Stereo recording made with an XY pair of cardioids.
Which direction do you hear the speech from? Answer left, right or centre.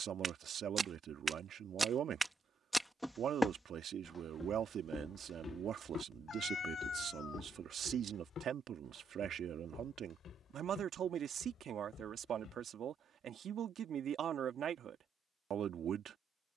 right.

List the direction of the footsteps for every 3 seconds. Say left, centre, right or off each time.
right, left, left, left, left, off.